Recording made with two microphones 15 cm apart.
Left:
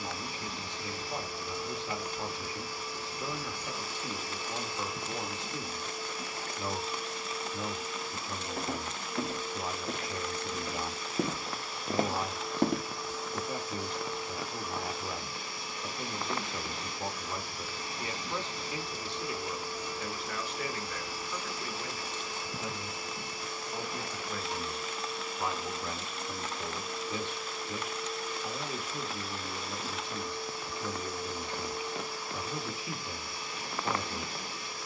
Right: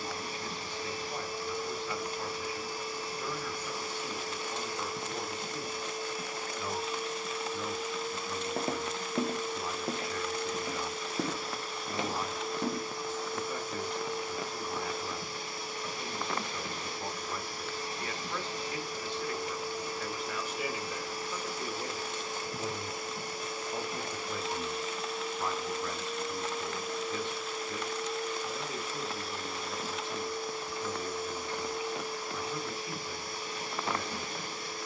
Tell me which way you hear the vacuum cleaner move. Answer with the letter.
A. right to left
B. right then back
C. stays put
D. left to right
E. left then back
C.